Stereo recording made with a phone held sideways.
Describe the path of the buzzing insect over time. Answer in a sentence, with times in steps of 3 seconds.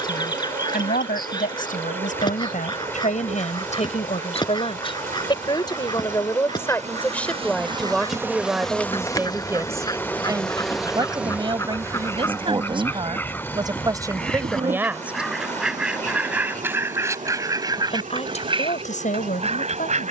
In this clip you hear the buzzing insect on the right from 0 s, in the centre from 9 s and on the right from 12 s.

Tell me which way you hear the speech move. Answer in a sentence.
In this clip you hear the speech go right and come back.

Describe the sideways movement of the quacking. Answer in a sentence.
In this clip you hear the quacking go from the left side to the right.